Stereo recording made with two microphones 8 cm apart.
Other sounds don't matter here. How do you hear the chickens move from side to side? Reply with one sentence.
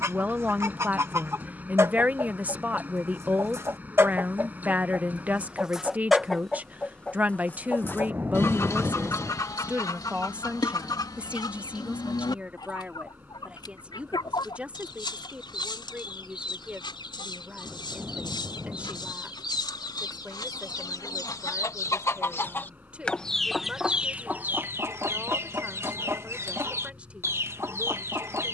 You can hear the chickens go left and come back.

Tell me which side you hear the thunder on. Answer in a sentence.
You can hear the thunder on the right.